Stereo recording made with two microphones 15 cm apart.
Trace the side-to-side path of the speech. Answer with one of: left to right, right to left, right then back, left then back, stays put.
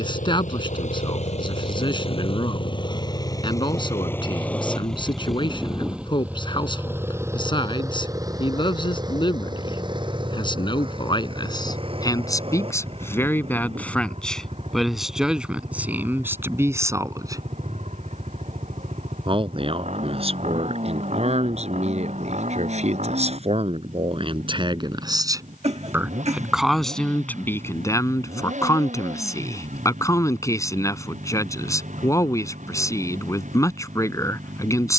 right then back.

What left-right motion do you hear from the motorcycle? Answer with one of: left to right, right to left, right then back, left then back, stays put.
left to right.